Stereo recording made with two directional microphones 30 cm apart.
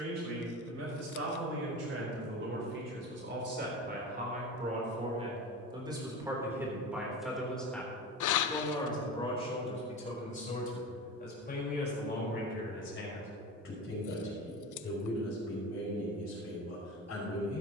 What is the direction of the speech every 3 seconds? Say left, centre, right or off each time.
right, right, centre, left, left, left.